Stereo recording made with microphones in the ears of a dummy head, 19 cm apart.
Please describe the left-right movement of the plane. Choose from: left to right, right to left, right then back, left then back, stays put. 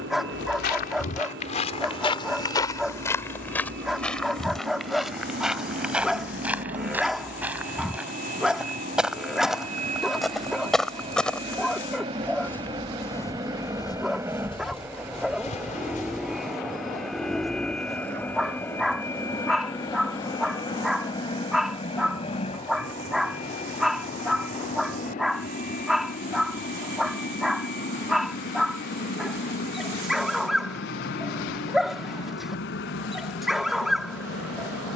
right to left.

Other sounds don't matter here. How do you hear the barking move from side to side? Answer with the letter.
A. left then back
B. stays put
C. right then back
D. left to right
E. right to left
B.